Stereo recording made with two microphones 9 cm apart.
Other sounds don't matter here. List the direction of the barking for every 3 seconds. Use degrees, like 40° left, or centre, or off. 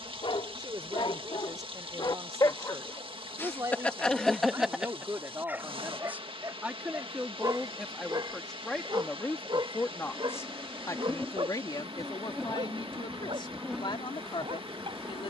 60° left, centre, 40° right, 60° right, 60° right.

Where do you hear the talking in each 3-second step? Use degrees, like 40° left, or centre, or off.
40° right, 30° right, centre, 30° left, 60° left.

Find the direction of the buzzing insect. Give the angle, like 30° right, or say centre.
centre.